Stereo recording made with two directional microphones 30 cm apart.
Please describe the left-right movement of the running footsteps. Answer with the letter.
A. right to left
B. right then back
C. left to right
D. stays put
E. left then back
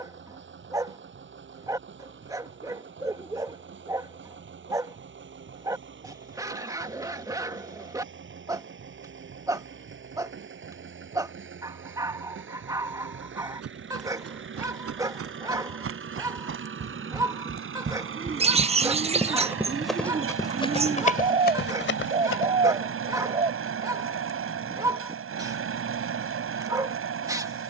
A.